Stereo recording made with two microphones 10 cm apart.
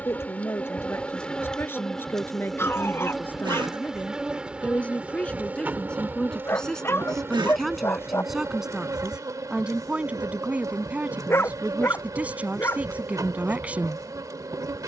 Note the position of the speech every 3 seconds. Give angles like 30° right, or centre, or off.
20° left, 10° left, centre, 10° right, 20° right.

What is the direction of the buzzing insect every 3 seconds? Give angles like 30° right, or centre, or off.
10° left, 10° right, 30° right, 40° right, 40° right.